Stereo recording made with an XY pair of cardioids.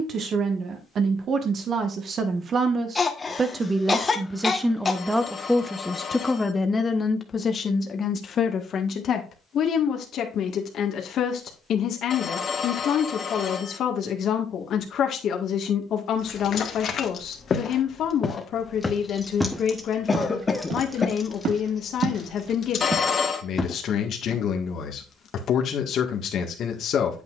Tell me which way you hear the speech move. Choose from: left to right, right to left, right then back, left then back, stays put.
right to left.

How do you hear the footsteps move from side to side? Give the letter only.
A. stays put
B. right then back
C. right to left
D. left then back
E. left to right
B.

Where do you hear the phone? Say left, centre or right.
left.